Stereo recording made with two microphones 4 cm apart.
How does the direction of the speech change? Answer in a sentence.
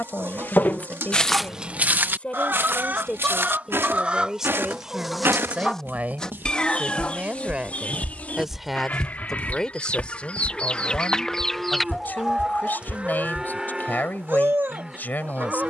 You can hear the speech move from left to right and back again.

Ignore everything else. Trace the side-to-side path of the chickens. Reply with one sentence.
You can hear the chickens go left and come back.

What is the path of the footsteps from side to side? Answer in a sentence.
In this clip you hear the footsteps move from left to right and back again.